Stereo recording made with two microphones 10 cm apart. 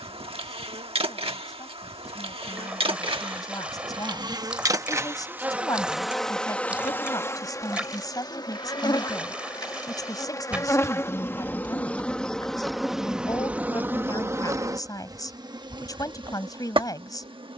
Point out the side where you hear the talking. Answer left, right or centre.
left.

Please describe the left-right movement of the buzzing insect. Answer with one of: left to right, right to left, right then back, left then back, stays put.
left then back.